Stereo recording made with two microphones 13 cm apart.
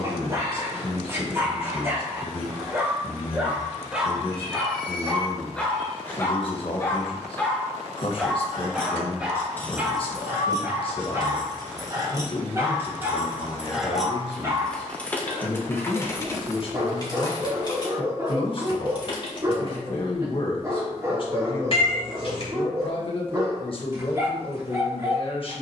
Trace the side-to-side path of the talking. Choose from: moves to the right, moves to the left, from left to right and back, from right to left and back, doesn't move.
doesn't move.